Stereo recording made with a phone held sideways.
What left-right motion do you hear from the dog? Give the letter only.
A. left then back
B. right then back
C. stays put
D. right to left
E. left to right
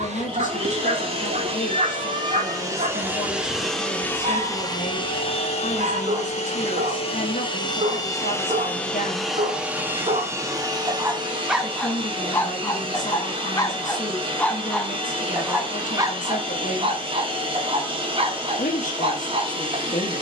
A.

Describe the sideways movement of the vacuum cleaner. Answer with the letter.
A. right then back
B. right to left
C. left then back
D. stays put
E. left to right
C.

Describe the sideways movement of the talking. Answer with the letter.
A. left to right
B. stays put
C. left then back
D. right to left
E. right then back
B.